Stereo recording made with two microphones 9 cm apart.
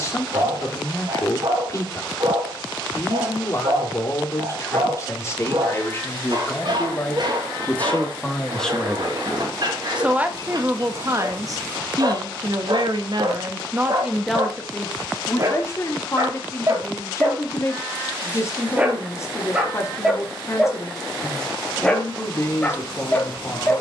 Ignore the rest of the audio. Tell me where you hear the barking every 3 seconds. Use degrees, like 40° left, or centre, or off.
50° right, 50° right, 50° right, 50° right, 50° right, 40° right, 10° right, 20° left.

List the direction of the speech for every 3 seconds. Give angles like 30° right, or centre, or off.
30° left, 30° left, 20° left, 20° right, 30° right, 30° left, 30° left, 30° left.